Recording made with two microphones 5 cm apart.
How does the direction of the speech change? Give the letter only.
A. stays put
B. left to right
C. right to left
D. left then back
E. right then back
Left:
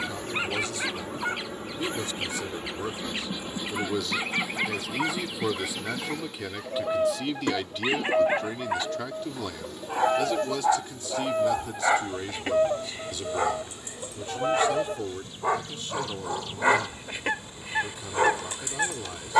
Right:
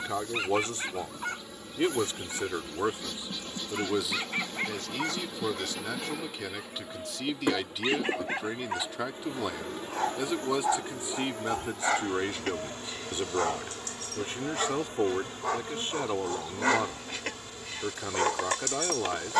D.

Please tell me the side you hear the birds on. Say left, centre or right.
left.